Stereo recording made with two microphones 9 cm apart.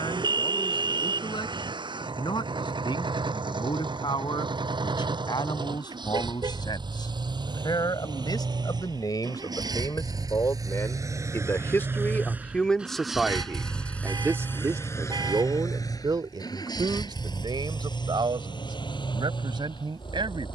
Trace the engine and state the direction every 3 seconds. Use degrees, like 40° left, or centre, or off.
80° right, 70° right, 60° right, 50° right, centre, 50° left, 70° left.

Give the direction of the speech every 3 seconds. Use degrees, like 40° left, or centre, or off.
70° left, 70° left, 60° left, 40° left, 10° right, 60° right, 70° right.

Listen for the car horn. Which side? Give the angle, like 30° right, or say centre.
60° right.